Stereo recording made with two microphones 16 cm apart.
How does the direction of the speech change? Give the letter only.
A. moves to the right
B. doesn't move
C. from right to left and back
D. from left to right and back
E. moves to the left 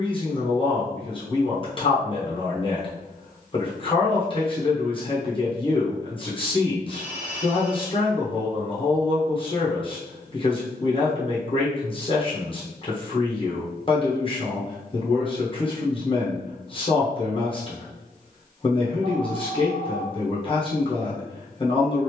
B.